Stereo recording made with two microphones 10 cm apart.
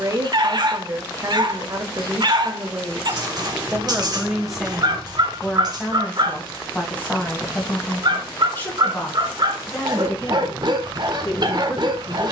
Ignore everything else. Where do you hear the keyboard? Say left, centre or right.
right.